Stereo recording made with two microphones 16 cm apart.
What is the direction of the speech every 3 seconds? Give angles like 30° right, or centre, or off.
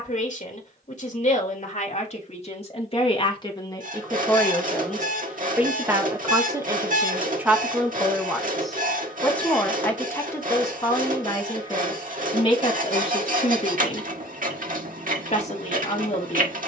40° left, 10° left, 10° right, 20° left, 40° left, 40° left.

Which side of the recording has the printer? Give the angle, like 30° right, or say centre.
60° right.